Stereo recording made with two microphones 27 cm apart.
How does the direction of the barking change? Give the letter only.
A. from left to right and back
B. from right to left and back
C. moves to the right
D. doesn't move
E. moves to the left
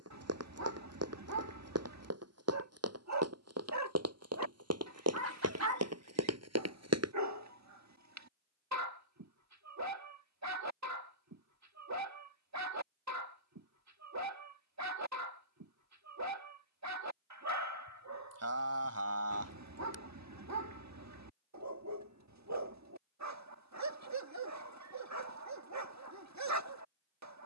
D.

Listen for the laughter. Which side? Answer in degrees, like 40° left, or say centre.
60° right.